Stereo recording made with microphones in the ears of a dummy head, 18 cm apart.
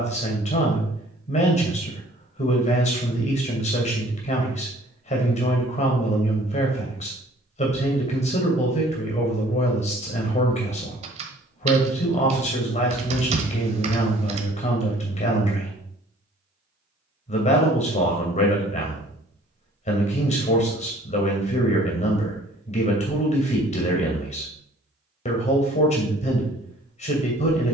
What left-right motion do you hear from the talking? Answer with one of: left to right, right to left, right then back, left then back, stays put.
stays put.